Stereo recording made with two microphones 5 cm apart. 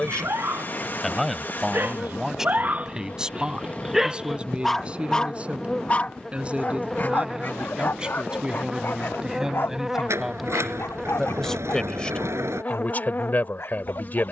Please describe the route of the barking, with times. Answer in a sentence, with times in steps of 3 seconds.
In this clip you hear the barking on the right from 0 s, in the centre from 3 s and on the left from 6 s.